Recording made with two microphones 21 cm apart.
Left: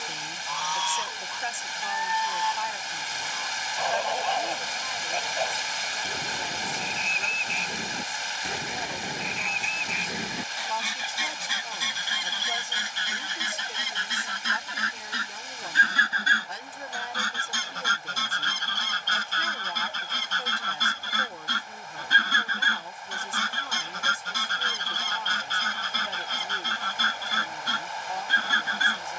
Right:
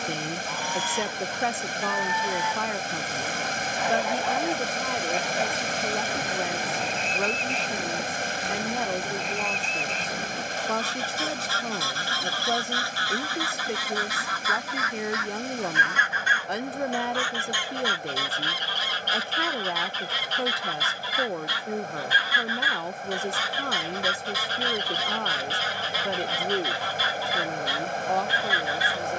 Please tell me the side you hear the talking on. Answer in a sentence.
In this clip you hear the talking on the right.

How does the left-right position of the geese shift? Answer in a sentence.
You can hear the geese move to the left.